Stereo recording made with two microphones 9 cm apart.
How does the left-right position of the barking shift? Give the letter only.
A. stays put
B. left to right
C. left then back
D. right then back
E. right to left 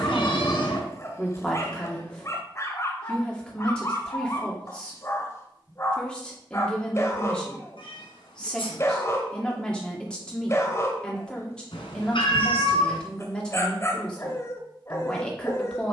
A.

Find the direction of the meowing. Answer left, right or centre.
left.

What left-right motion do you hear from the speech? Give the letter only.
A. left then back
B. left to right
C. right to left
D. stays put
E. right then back
D.